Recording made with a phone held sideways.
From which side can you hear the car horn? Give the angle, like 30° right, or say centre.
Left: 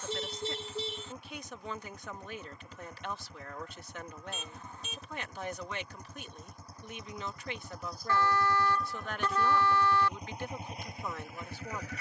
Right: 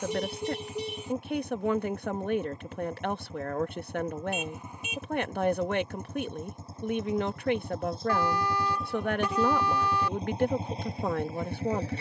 10° right.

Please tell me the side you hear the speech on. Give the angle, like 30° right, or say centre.
60° right.